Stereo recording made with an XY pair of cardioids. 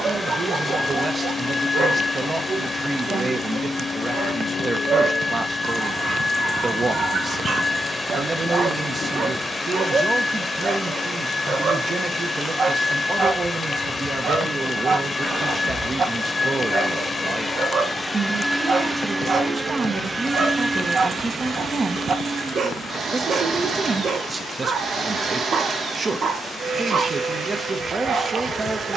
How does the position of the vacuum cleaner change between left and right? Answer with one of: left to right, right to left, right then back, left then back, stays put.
left to right.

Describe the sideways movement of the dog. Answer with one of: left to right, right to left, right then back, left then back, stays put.
stays put.